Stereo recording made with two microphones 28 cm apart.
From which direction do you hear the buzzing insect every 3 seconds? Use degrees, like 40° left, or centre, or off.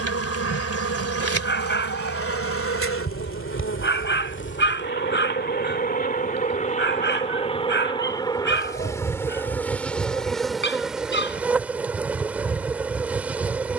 60° left, 40° left, 20° left, centre, 10° right.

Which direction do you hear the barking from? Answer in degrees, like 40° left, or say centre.
40° left.